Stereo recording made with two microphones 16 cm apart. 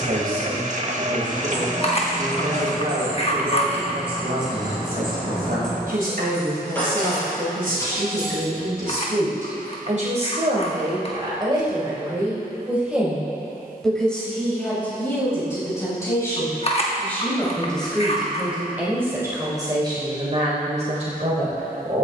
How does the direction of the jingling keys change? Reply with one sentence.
In this clip you hear the jingling keys go from the right side to the left.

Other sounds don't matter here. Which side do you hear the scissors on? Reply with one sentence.
You can hear the scissors on the left.